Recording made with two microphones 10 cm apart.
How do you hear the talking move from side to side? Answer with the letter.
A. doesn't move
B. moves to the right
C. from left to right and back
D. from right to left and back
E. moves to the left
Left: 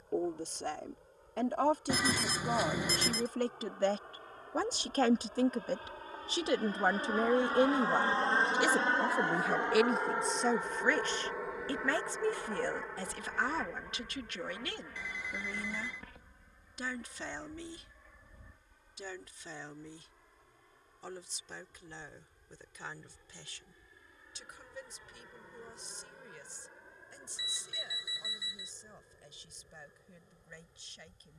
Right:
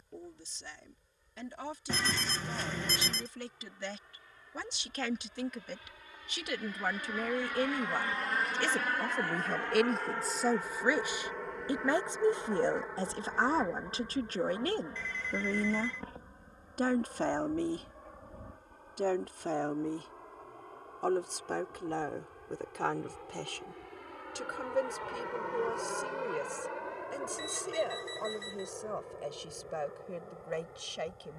B.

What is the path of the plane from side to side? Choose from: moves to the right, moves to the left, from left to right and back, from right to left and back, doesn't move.
moves to the right.